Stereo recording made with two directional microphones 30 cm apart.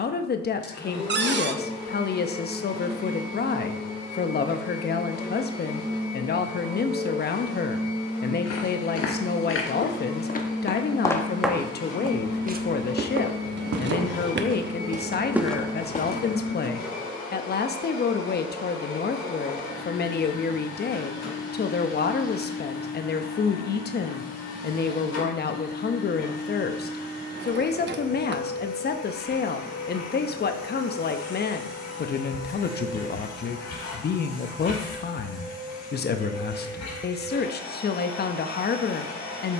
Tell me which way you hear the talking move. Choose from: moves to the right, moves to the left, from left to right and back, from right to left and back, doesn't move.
doesn't move.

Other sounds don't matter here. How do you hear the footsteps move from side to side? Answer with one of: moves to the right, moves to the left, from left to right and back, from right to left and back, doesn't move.
from left to right and back.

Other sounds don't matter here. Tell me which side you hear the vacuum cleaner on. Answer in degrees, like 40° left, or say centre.
60° left.